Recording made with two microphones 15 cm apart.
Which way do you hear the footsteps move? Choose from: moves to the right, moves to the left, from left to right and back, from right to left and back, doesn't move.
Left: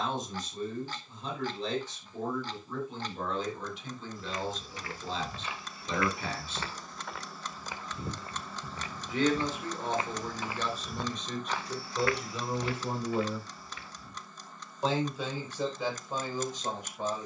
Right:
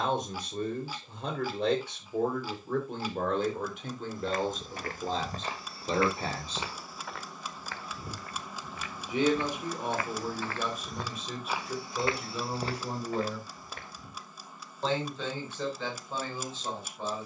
from right to left and back.